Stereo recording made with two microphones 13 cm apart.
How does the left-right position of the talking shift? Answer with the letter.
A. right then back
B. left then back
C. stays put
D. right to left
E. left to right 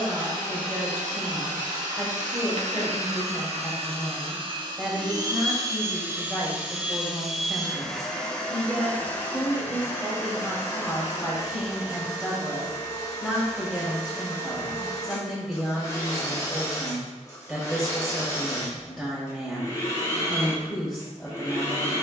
C.